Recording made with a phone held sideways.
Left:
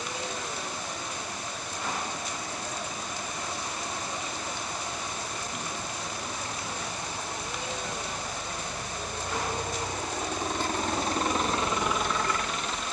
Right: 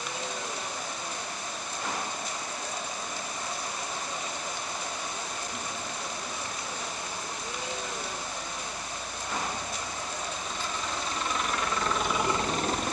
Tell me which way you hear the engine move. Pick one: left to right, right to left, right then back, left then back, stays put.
left to right.